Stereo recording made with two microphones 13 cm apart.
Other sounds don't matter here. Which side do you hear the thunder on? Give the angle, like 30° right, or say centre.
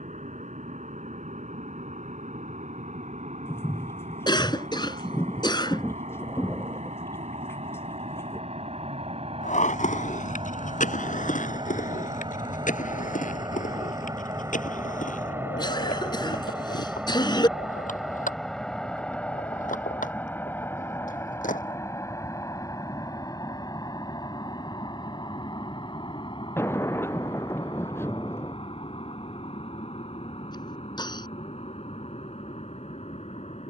20° left.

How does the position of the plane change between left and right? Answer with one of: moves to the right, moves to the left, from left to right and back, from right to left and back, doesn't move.
moves to the left.